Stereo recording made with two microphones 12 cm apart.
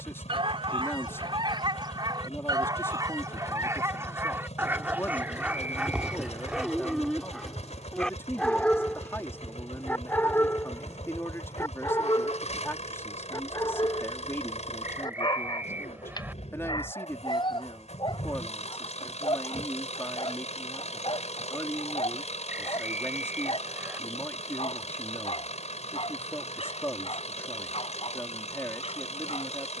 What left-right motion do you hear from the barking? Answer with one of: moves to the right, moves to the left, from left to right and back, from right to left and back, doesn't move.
moves to the left.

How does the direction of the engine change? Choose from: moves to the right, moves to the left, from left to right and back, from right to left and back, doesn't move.
doesn't move.